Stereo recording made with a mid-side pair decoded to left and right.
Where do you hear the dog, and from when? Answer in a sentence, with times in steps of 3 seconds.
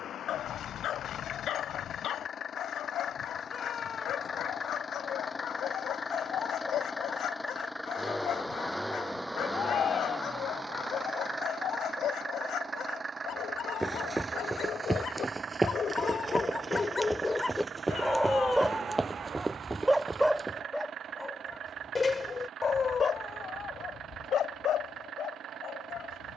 In this clip you hear the dog on the left from 0 s, in the centre from 18 s and on the left from 21 s.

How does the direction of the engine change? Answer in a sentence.
In this clip you hear the engine move from left to right.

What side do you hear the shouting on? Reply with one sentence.
In this clip you hear the shouting on the left.